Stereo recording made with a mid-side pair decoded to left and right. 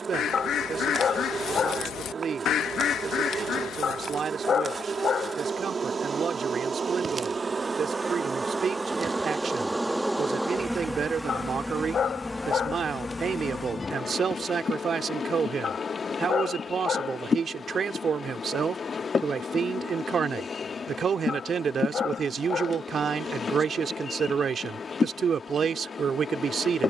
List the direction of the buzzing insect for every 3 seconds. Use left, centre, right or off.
right, right, right, centre, left, left, left, left, left.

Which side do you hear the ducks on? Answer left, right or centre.
left.